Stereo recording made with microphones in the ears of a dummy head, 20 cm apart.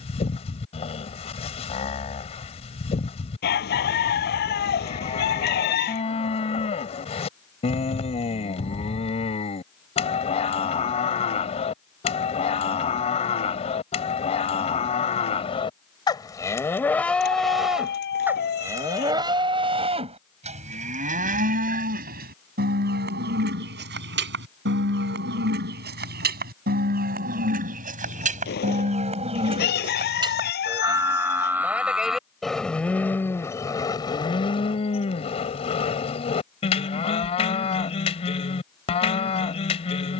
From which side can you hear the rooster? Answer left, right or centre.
left.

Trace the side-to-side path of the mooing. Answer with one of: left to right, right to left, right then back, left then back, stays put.
right then back.